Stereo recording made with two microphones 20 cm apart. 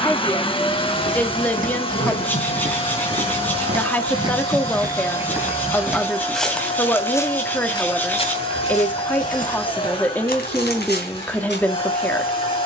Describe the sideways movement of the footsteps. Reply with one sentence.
You can hear the footsteps move from right to left.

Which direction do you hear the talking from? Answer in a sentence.
You can hear the talking in the centre.